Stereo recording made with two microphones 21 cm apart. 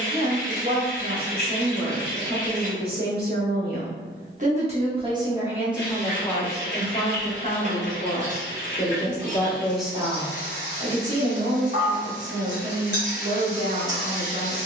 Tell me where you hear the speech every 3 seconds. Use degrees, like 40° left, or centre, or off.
50° right, 30° right, 30° left, 20° right, 40° right.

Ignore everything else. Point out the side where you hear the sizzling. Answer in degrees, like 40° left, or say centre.
30° right.